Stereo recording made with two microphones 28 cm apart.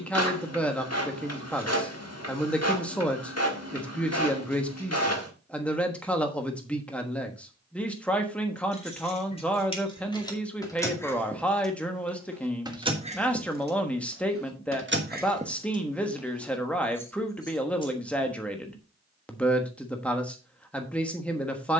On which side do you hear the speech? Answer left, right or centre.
centre.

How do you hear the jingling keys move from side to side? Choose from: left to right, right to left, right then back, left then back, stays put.
right then back.